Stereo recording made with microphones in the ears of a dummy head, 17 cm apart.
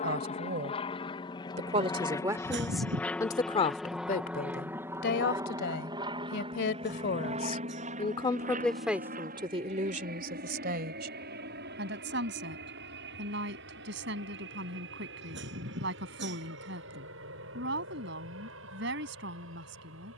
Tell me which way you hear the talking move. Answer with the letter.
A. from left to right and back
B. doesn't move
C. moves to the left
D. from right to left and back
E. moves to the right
D.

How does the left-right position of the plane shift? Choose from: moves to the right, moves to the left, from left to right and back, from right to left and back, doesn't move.
moves to the right.